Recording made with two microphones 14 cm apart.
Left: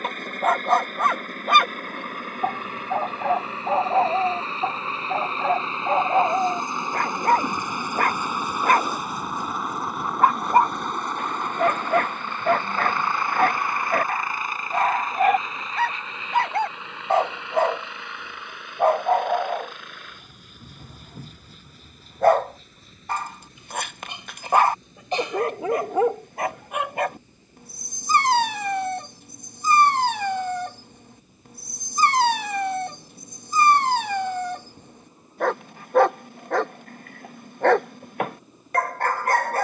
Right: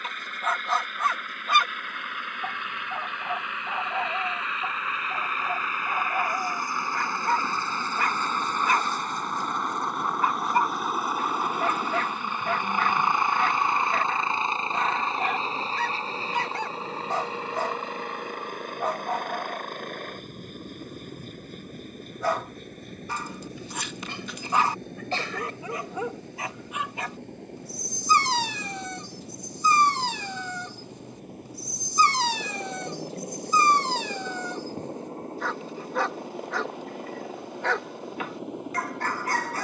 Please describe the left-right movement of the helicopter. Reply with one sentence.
You can hear the helicopter move from left to right.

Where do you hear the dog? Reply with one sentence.
You can hear the dog on the left.